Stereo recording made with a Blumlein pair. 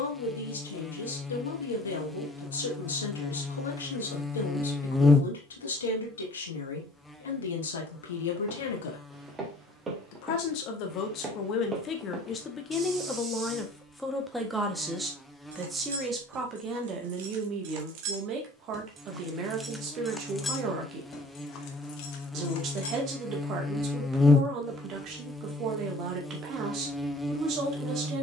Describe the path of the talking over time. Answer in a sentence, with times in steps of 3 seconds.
In this clip you hear the talking on the left from 0 s, in the centre from 12 s and on the right from 15 s.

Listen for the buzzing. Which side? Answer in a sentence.
In this clip you hear the buzzing in the centre.